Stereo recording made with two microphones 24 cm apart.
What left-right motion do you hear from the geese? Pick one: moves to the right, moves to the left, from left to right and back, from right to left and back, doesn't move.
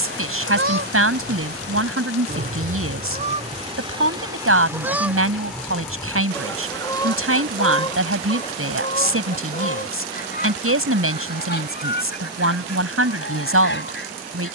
moves to the left.